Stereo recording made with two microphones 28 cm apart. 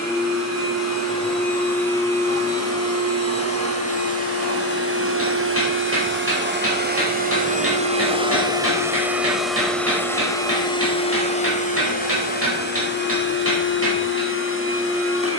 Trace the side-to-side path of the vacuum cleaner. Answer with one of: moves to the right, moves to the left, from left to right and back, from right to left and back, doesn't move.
moves to the left.